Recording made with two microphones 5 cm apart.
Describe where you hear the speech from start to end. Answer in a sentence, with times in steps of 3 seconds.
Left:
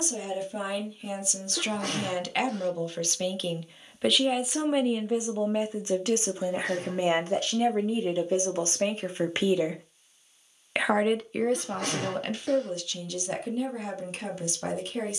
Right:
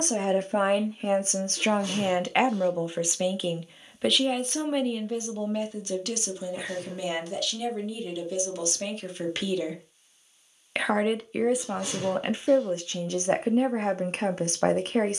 You can hear the speech on the right from 0 s, in the centre from 3 s, on the left from 6 s, in the centre from 9 s and on the right from 12 s.